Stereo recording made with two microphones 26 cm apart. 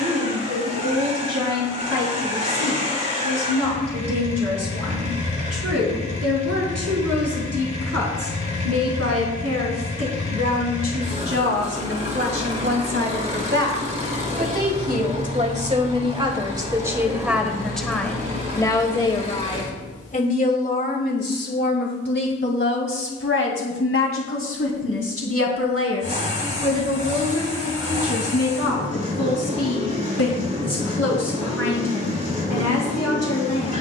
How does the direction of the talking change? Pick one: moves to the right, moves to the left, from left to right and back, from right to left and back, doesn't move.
moves to the left.